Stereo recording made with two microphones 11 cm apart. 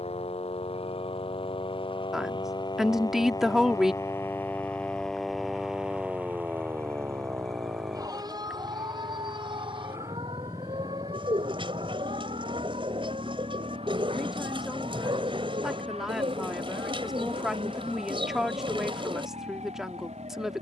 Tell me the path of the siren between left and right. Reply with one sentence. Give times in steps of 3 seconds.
In this clip you hear the siren on the left from 0 s, in the centre from 3 s and on the right from 6 s.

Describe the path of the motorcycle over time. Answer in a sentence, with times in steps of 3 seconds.
In this clip you hear the motorcycle on the left from 0 s, in the centre from 6 s and on the right from 9 s.